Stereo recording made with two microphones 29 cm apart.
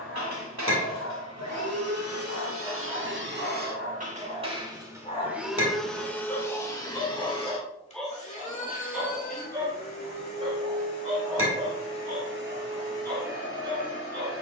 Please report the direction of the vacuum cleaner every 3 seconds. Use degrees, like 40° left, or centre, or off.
60° right, 20° right, 20° left, 40° left, 40° left.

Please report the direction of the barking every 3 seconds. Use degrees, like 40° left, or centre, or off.
50° left, 40° left, centre, 20° right, 30° right.